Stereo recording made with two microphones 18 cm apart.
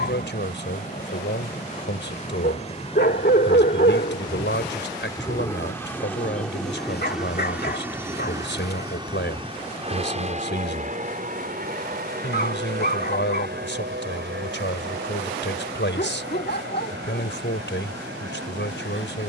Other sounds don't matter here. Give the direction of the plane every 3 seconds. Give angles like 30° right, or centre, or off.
40° left, 20° left, 10° right, 40° right, 60° right, 70° right, 70° right.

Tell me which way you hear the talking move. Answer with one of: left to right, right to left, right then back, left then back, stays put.
stays put.